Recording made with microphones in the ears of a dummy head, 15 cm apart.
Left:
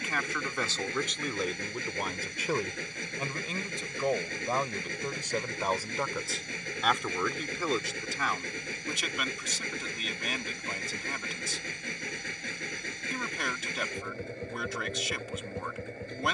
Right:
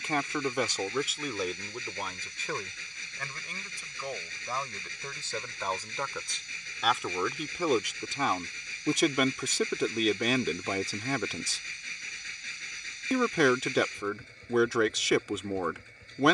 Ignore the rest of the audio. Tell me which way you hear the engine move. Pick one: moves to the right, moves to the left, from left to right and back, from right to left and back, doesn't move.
doesn't move.